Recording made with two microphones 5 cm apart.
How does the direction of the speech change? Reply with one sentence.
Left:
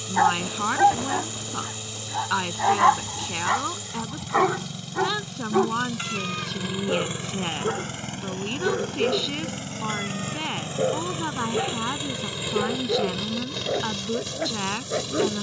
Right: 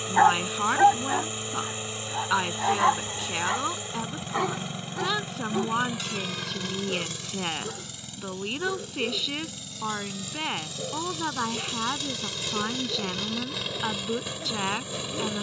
In this clip you hear the speech stay in one place.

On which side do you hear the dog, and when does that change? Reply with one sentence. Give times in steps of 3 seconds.
You can hear the dog in the centre from 0 s and on the left from 3 s.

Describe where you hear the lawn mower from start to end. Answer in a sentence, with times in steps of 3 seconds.
You can hear the lawn mower on the right from 0 s, on the left from 6 s and in the centre from 12 s.